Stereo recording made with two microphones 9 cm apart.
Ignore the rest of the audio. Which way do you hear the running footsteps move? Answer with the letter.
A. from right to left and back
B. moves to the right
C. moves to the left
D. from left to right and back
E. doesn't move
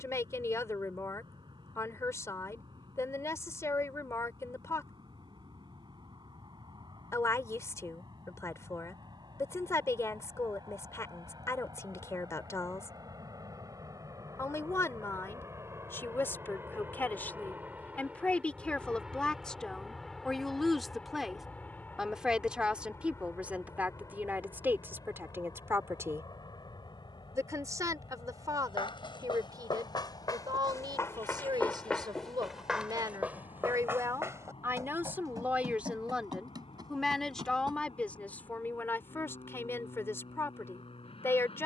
B.